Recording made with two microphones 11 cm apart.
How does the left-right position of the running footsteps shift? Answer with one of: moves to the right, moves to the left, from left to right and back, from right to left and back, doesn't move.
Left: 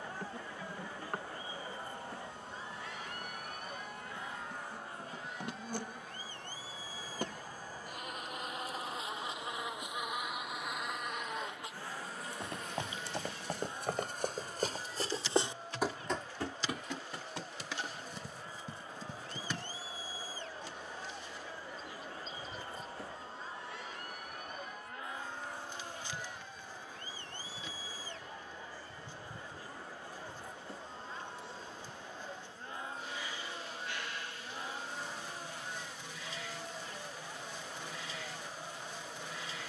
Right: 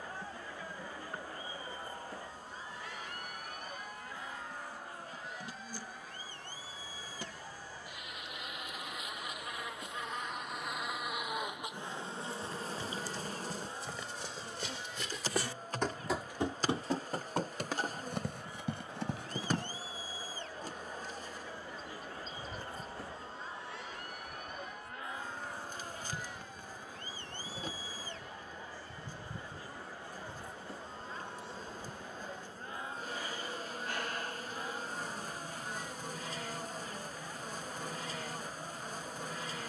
moves to the right.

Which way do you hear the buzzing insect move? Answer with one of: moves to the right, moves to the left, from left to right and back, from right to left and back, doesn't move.
moves to the right.